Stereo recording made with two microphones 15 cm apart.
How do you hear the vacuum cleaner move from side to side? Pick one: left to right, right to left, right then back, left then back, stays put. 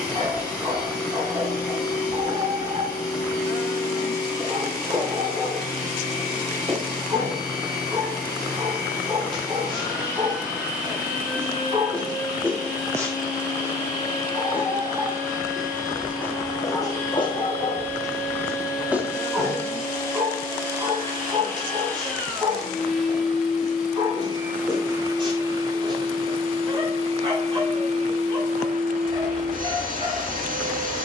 left to right.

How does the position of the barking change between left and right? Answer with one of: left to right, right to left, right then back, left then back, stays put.
left then back.